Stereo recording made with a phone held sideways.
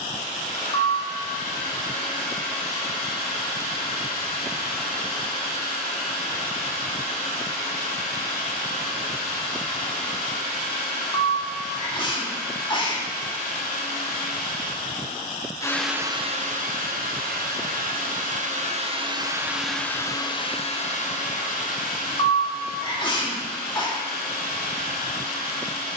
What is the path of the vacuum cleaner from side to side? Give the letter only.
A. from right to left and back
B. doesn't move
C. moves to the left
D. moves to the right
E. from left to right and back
E.